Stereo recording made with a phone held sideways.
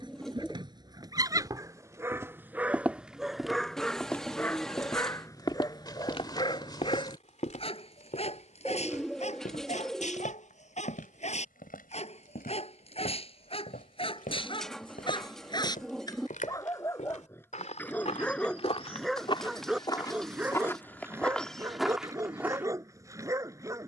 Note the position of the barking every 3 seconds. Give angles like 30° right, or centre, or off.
20° right, 10° left, 40° left, 50° left, 40° left, 20° left, centre, 20° right.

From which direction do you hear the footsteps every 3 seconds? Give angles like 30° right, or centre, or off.
20° right, 10° left, 50° left, 70° left, 80° left, 60° left, 30° left, centre.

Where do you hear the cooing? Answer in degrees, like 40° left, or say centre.
centre.